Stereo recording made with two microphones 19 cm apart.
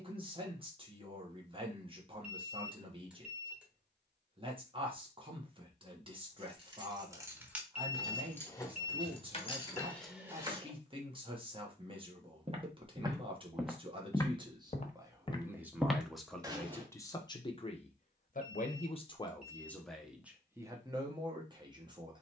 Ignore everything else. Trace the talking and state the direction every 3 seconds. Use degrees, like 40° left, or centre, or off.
30° right, 30° right, 30° right, 30° right, 30° right, 10° left, 10° left, 20° right.